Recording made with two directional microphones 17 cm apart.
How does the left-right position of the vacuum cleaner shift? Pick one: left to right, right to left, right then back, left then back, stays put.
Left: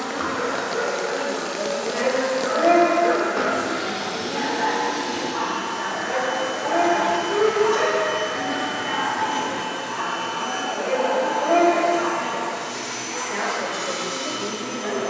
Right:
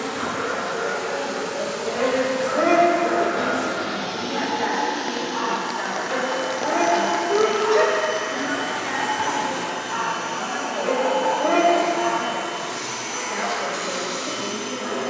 left to right.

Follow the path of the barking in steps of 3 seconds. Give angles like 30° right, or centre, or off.
20° left, 10° left, 20° right, 20° right, centre.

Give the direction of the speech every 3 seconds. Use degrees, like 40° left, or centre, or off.
10° left, 20° right, 40° right, 20° right, 10° left.